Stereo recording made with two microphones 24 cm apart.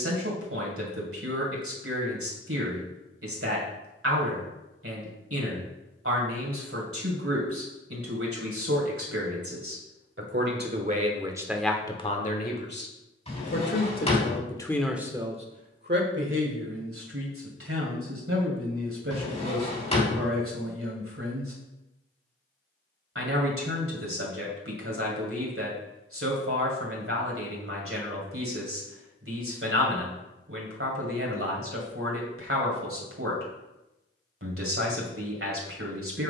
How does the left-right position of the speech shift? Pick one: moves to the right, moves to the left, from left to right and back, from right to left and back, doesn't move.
from right to left and back.